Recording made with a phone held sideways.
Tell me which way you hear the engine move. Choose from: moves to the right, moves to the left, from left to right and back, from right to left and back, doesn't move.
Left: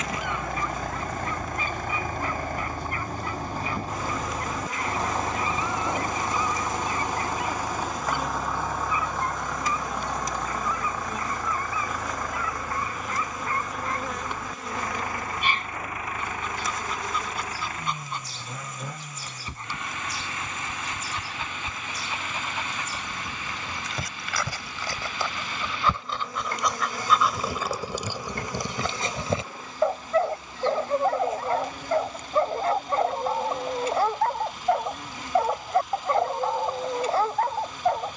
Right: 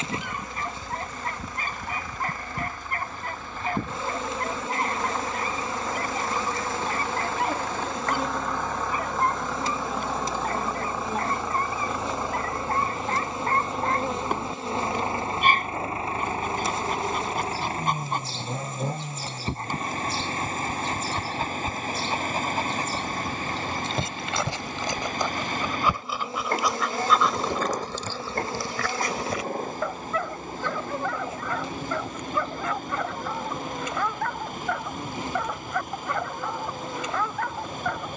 moves to the right.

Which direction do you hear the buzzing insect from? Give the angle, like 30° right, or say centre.
30° right.